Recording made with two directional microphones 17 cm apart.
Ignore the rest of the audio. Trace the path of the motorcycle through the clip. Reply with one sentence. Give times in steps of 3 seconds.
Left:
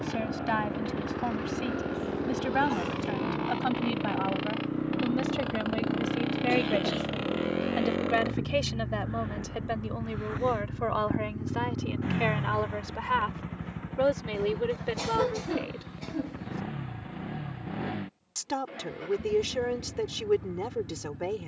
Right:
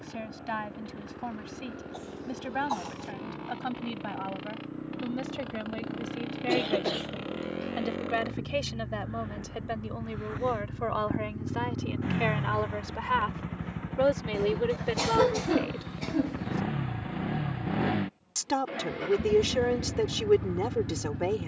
In this clip you hear the motorcycle on the left from 0 s, in the centre from 9 s and on the right from 15 s.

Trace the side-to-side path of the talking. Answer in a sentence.
In this clip you hear the talking go from the left side to the right.